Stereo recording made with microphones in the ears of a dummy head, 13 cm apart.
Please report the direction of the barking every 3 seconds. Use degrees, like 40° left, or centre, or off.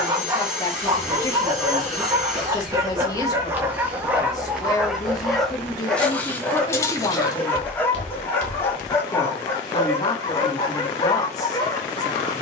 20° right, 10° right, 10° left, 20° left.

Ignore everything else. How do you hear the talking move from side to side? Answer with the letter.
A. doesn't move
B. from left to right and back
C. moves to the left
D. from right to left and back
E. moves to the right
A.